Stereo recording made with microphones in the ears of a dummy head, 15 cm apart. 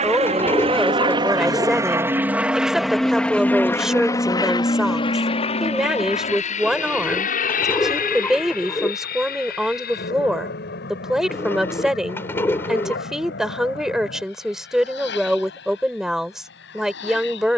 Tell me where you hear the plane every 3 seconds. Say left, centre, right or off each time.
right, left, left, left, left, left.